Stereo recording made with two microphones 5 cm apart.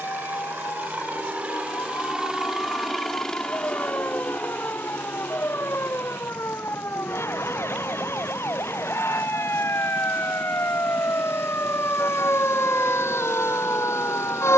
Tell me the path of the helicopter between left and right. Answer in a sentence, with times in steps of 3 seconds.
In this clip you hear the helicopter on the right from 0 s and on the left from 3 s.